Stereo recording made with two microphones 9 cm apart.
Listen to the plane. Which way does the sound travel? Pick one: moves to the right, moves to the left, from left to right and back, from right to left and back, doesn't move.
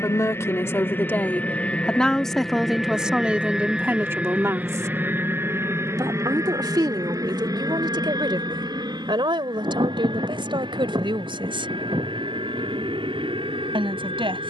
moves to the right.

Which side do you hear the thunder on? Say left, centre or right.
right.